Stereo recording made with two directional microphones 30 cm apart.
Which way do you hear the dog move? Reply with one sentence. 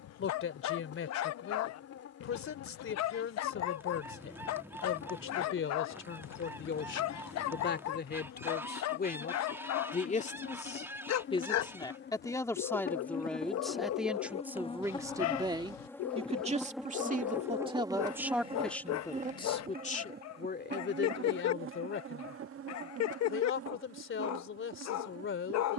You can hear the dog stay put.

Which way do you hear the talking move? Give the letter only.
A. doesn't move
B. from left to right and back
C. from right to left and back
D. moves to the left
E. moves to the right
B.